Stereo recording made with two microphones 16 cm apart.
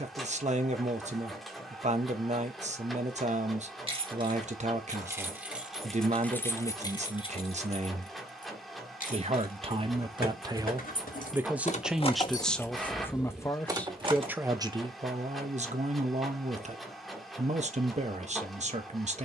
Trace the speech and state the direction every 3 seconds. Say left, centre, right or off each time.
right, right, right, right, centre, right, right.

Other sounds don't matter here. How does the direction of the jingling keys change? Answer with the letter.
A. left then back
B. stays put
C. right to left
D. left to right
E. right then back
A.